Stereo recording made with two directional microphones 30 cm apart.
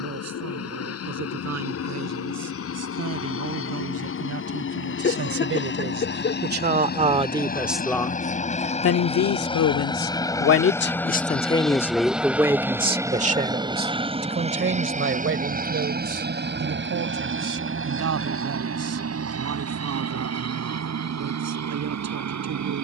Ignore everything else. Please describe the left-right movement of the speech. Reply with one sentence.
In this clip you hear the speech move from right to left and back again.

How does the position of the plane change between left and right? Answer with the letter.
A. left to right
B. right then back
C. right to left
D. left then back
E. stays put
A.